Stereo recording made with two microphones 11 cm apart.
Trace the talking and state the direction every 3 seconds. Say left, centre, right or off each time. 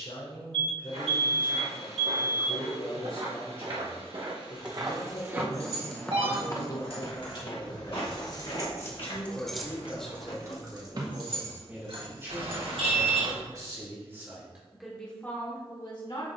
left, left, left, centre, right, left.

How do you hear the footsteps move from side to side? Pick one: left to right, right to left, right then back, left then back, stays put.
right to left.